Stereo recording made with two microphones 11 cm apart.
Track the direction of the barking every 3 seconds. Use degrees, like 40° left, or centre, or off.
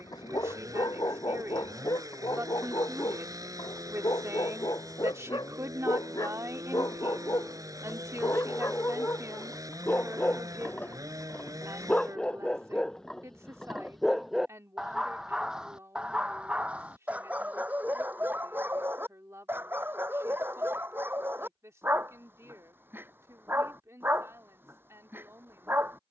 40° left, 40° left, 30° left, 20° left, centre, 10° right, 20° right, 20° right, 20° right.